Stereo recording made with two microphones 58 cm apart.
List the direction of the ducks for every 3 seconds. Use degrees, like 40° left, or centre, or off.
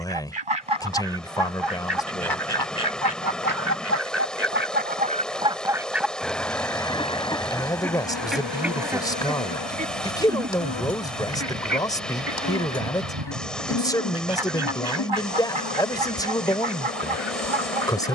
60° right, 20° right, centre, 30° right, 50° right, 70° right.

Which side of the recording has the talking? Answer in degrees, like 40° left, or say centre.
10° left.